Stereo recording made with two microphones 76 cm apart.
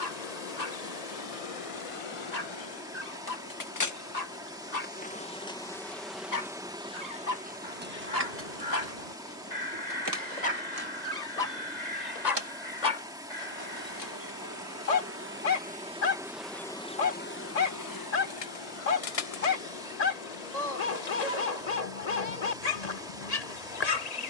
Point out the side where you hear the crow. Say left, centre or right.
left.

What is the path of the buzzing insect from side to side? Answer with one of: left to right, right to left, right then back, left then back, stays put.
right then back.